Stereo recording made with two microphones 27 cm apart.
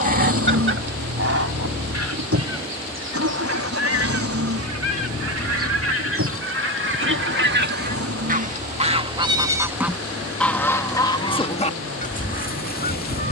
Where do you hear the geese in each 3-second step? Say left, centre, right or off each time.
right, right, right, centre, left.